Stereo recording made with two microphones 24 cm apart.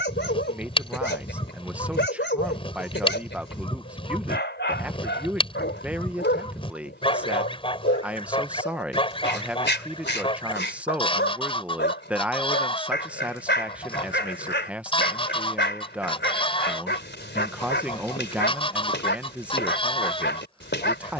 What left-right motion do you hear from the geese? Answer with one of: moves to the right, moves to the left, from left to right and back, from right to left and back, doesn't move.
doesn't move.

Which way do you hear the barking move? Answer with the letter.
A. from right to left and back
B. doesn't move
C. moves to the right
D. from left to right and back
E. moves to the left
B.